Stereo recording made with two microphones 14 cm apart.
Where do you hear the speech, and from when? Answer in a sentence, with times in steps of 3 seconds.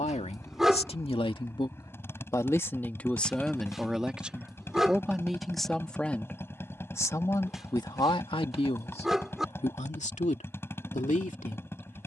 You can hear the speech on the left from 0 s, in the centre from 3 s and on the left from 6 s.